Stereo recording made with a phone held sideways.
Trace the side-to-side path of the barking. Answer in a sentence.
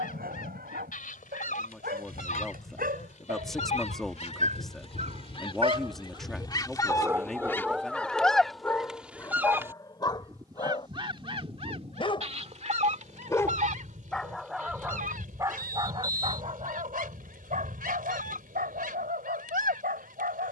You can hear the barking go left and come back.